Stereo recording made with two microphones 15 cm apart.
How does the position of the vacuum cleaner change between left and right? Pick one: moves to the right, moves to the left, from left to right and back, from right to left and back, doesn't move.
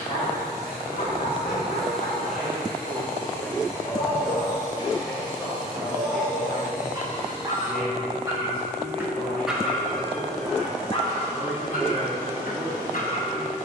from right to left and back.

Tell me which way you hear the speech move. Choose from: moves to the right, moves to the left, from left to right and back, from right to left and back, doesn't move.
doesn't move.